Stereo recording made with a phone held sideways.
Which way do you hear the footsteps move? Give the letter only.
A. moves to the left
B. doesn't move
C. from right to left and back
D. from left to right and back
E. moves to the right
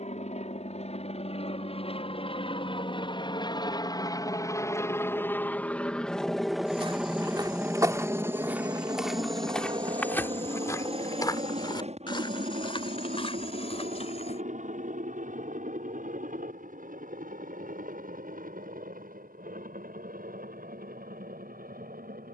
A.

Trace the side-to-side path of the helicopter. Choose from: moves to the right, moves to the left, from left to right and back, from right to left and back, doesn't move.
moves to the right.